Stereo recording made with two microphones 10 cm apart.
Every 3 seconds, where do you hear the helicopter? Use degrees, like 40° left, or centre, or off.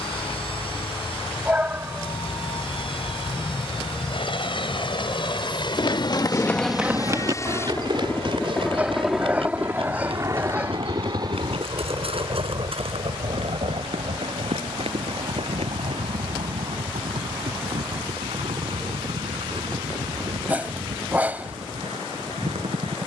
70° left, 60° left, 30° left, 30° right, 60° right, 70° right, 70° right, 80° right.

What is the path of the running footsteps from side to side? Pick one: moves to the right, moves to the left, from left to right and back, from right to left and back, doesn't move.
moves to the right.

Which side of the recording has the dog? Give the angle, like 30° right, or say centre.
20° right.